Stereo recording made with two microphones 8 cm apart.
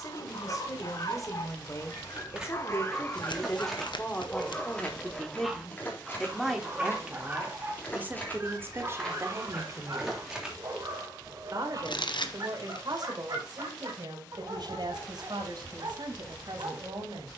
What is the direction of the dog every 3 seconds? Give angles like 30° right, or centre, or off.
50° left, 10° left, 20° right, 40° right, 50° right, 60° right.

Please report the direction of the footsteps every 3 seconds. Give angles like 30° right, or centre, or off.
10° right, 10° left, 30° left, centre, off, off.